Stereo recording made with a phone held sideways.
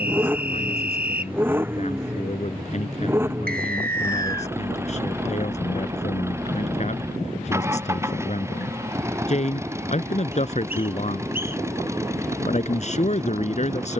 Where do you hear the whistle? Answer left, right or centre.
right.